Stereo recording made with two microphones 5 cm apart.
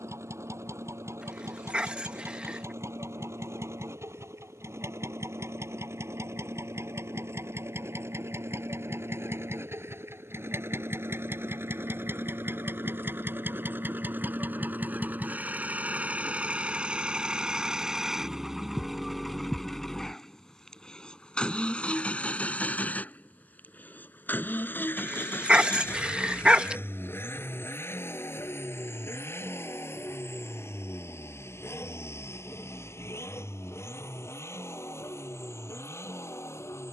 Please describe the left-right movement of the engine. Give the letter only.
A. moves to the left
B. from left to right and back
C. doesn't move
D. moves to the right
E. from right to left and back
A.